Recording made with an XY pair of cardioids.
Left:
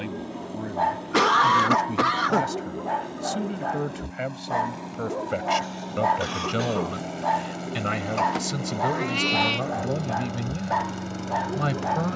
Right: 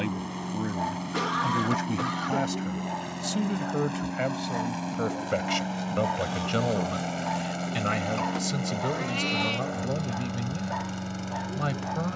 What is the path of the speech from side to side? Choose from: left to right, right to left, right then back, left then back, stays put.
right to left.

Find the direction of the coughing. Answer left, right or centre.
left.